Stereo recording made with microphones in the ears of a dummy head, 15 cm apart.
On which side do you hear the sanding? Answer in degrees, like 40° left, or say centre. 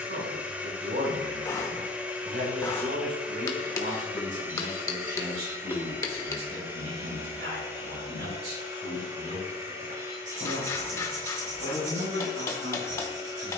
60° right.